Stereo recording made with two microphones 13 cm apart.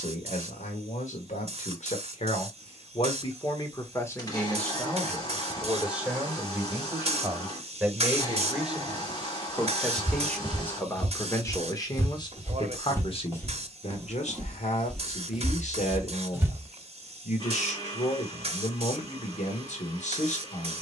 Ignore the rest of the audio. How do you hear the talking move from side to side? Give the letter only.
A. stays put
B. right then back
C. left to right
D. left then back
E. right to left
B.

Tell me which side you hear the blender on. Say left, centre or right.
left.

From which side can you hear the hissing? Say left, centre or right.
right.